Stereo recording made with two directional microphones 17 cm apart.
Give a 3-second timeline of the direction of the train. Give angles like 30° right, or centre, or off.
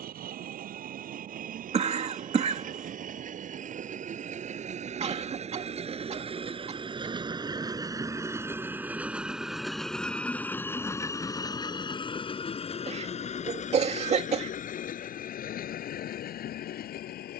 60° right, 40° right, 20° right, 10° left, 40° left, 60° left.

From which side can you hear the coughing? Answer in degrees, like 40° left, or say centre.
40° right.